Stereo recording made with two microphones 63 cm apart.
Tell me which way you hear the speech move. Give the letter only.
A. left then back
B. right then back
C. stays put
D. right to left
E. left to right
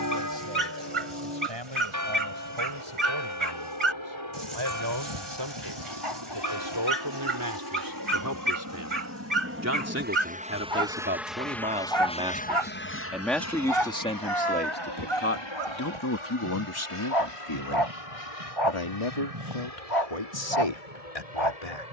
D.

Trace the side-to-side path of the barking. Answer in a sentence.
You can hear the barking stay put.